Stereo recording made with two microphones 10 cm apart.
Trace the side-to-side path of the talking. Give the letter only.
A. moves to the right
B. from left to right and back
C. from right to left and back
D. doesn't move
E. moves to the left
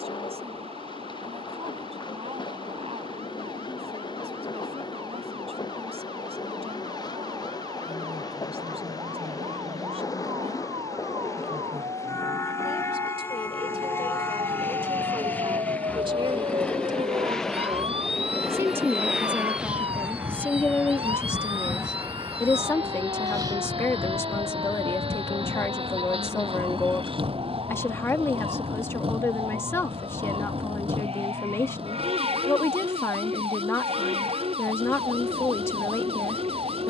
E.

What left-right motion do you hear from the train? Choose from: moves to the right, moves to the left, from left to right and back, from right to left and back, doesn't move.
moves to the right.